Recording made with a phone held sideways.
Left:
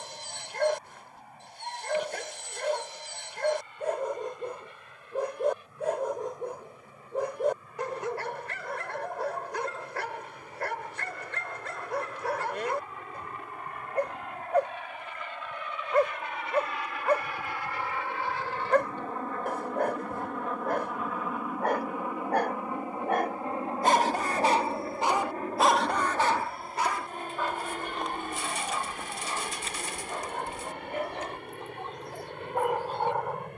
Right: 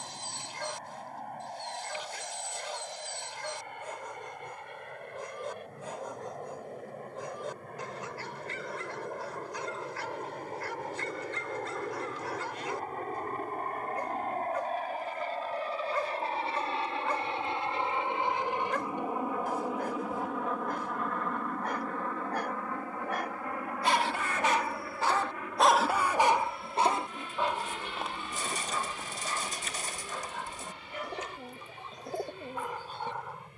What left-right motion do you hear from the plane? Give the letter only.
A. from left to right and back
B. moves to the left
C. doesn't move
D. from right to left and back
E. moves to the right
B.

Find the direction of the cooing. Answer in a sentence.
In this clip you hear the cooing on the right.